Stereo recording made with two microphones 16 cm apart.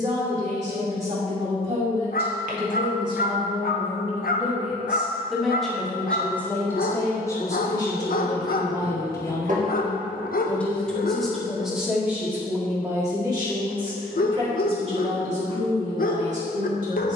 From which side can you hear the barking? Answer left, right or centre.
left.